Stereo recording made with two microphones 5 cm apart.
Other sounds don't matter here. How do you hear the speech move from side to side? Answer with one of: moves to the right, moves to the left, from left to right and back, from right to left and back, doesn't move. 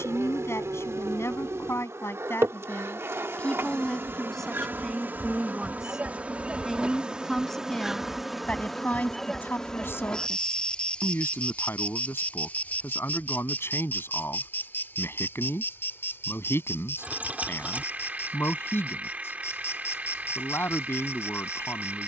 from left to right and back.